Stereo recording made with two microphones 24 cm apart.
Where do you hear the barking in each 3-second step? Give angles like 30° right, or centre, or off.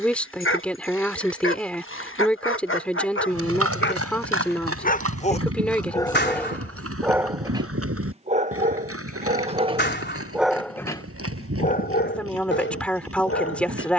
60° left, 40° left, 10° right, centre, 50° left.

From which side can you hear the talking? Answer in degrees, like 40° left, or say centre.
centre.